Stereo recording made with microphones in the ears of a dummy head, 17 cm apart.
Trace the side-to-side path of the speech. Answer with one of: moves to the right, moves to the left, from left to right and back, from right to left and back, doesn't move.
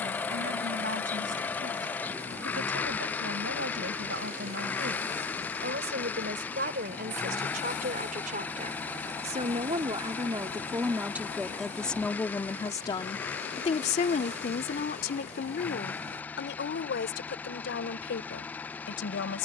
moves to the left.